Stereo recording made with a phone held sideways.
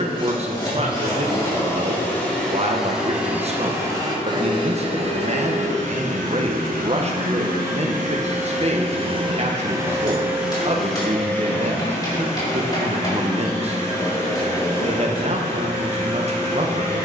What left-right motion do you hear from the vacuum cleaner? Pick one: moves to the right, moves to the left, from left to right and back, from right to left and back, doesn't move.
from left to right and back.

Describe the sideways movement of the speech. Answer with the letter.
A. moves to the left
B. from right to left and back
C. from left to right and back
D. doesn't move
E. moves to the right
D.